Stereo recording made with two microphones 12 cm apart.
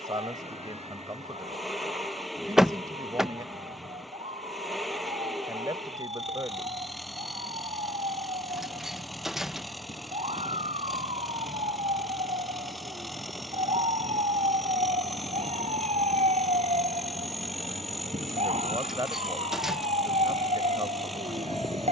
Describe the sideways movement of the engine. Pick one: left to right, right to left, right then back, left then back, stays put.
stays put.